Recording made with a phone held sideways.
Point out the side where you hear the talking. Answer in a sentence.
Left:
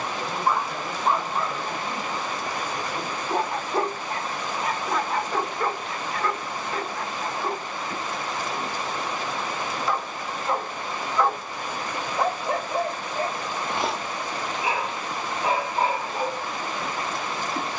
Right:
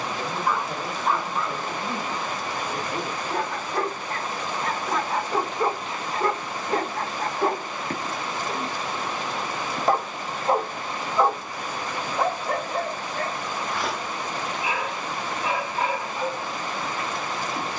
You can hear the talking on the right.